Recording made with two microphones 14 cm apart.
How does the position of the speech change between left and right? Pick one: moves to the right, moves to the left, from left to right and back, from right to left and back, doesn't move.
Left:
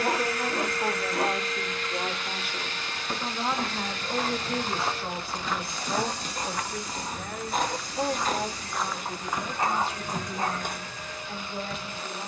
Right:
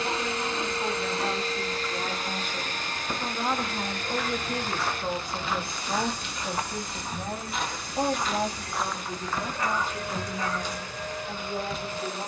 moves to the right.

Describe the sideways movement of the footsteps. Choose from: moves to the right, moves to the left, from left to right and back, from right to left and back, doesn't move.
from left to right and back.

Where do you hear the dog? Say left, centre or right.
left.